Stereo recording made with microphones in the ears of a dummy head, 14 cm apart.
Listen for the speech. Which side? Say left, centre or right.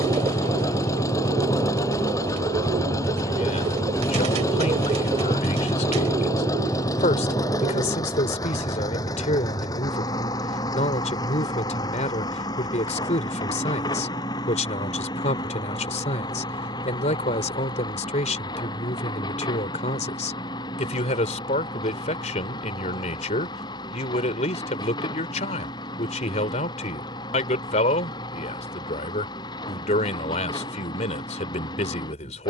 left.